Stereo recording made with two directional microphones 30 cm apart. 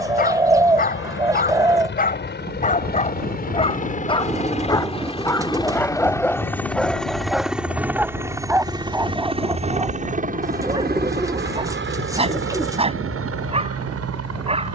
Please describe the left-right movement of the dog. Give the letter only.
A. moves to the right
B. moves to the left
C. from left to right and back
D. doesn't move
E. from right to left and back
A.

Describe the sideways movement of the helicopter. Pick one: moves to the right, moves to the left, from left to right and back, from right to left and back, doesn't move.
moves to the right.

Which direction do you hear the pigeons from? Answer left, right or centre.
centre.